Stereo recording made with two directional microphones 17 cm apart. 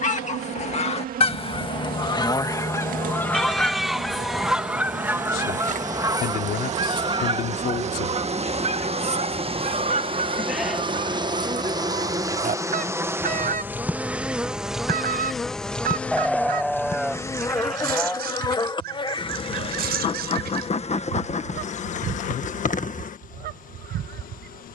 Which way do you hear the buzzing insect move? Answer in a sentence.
You can hear the buzzing insect move from right to left.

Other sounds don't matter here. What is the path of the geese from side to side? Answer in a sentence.
You can hear the geese travel towards the right.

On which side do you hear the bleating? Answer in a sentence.
You can hear the bleating in the centre.